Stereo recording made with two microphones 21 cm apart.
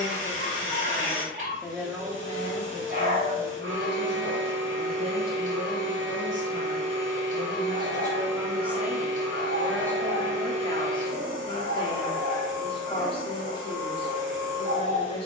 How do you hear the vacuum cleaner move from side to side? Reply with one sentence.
In this clip you hear the vacuum cleaner stay put.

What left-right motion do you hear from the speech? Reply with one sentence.
You can hear the speech go right and come back.